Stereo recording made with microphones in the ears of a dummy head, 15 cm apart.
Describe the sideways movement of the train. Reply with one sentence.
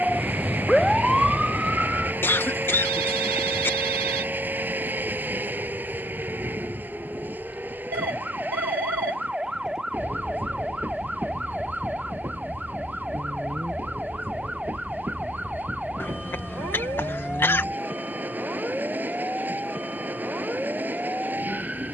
You can hear the train stay in one place.